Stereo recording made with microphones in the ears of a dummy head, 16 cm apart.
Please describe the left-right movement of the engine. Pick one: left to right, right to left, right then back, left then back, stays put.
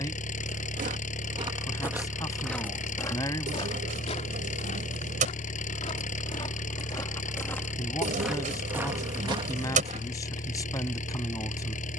stays put.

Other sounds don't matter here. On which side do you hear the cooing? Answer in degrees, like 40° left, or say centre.
40° right.